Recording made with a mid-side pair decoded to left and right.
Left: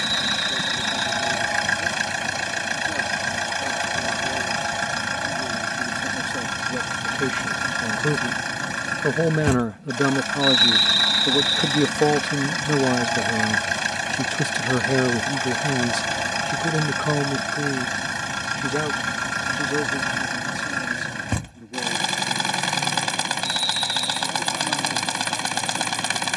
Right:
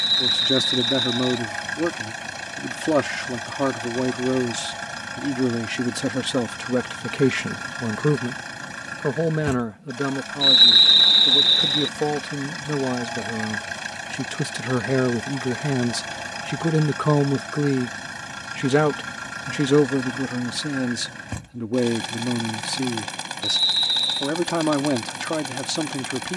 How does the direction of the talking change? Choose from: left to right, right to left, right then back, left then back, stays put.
left then back.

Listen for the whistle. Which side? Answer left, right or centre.
right.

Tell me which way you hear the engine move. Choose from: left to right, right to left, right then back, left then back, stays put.
stays put.